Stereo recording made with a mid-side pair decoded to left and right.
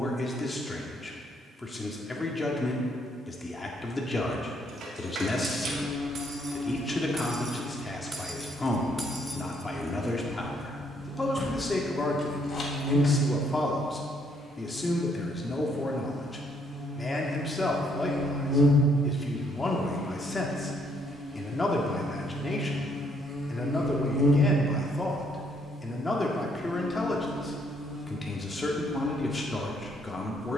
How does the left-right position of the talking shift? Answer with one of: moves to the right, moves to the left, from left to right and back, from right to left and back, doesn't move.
doesn't move.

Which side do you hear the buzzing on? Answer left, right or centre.
centre.